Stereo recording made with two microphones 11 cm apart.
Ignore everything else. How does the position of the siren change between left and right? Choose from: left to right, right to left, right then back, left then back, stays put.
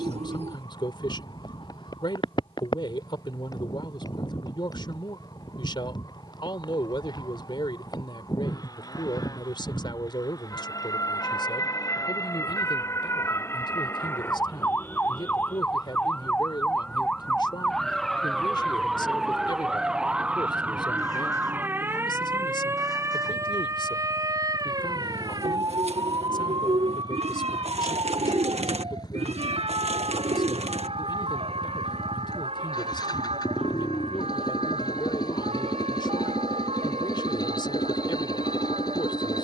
left to right.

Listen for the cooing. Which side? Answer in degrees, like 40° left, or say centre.
80° right.